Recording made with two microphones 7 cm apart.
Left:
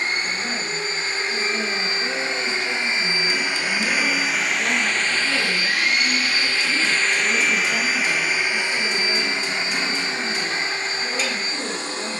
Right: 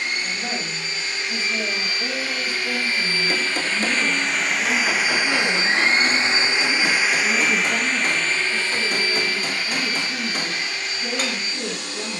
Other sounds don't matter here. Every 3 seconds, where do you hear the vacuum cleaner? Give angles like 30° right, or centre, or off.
30° left, centre, centre, 30° left.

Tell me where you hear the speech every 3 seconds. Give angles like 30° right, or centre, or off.
20° right, centre, 10° right, 20° right.